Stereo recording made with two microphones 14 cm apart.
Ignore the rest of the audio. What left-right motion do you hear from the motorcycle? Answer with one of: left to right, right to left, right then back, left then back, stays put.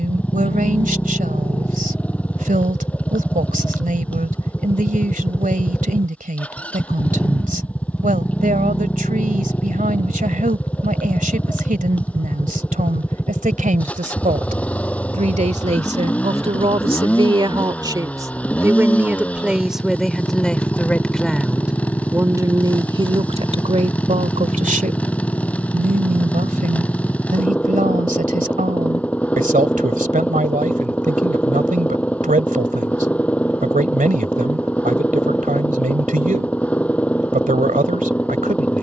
stays put.